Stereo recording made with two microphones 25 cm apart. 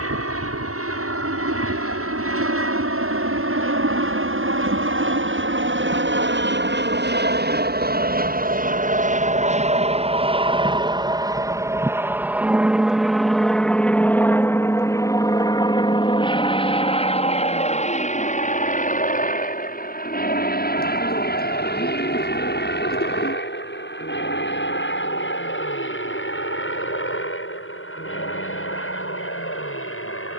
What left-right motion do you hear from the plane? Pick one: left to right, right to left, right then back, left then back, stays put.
right to left.